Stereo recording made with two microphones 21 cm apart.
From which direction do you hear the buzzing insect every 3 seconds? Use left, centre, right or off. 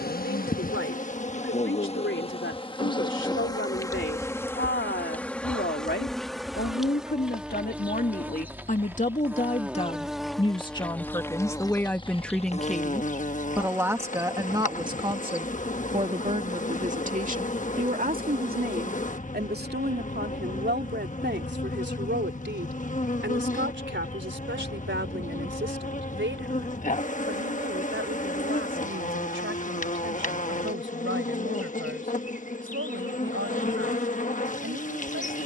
left, centre, centre, centre, left, left, left, left, left, left, left, left.